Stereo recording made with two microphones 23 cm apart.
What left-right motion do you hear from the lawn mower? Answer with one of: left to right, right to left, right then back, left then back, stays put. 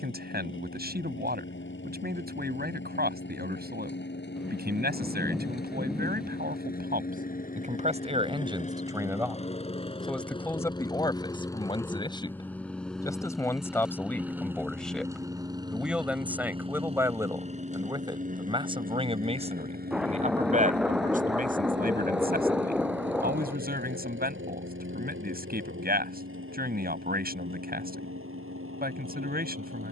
left to right.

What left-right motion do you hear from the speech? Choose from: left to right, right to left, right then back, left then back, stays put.
left then back.